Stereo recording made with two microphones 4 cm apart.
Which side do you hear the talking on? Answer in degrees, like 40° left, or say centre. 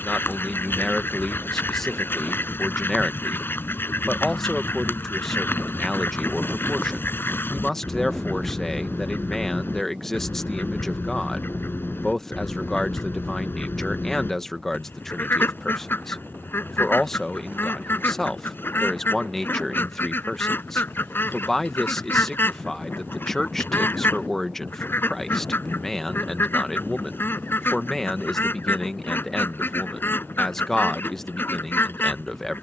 10° left.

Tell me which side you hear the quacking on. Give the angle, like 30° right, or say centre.
60° left.